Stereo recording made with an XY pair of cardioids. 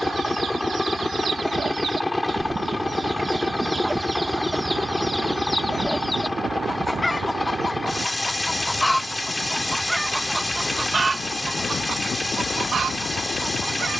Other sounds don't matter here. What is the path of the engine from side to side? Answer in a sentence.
In this clip you hear the engine stay in one place.